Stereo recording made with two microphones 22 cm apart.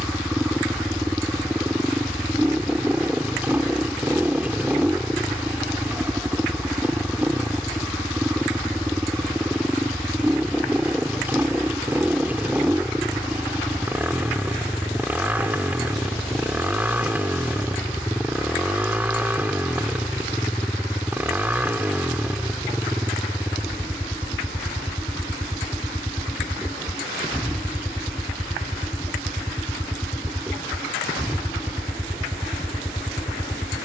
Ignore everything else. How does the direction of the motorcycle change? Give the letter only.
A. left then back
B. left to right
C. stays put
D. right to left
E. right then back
C.